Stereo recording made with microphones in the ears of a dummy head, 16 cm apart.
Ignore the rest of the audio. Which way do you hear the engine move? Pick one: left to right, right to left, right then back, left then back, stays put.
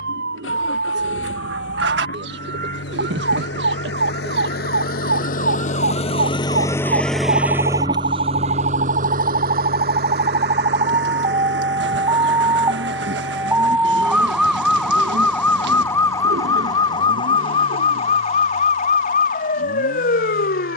left to right.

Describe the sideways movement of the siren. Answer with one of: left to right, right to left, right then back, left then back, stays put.
right to left.